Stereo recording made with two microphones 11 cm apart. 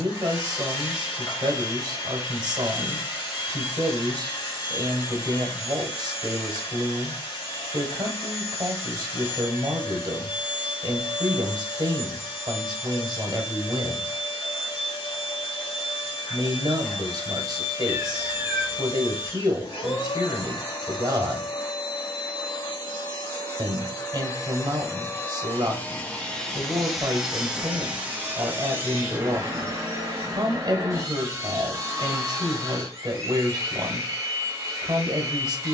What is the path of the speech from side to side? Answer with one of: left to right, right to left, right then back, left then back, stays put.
stays put.